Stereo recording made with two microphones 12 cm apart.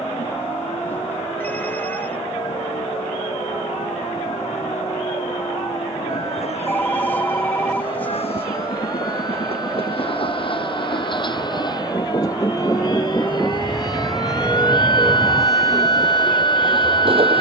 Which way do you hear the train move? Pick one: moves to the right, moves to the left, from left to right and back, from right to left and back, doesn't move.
moves to the right.